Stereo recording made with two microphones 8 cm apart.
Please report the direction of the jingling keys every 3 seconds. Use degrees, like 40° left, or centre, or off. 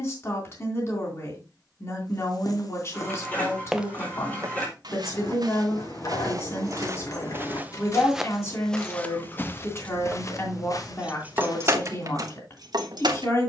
off, 60° left, 50° left, centre, 60° right.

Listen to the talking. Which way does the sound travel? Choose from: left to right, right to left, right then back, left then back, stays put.
stays put.